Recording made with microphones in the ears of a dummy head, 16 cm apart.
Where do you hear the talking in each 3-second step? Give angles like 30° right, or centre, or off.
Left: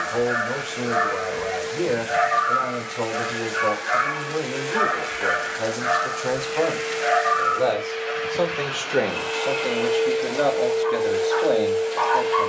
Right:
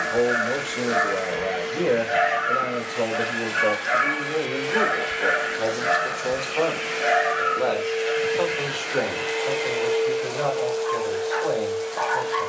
30° right, 20° right, 10° left, 30° left.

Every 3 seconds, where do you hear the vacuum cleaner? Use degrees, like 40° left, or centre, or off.
70° right, 60° right, 40° right, 10° left.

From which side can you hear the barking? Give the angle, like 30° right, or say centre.
30° right.